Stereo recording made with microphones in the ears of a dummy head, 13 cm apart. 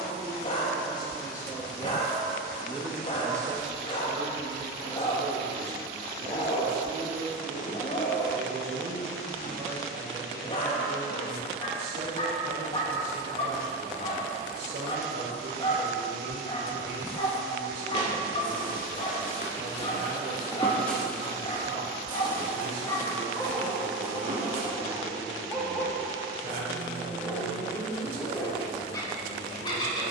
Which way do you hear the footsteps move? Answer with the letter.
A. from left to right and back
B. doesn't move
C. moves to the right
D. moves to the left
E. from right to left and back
C.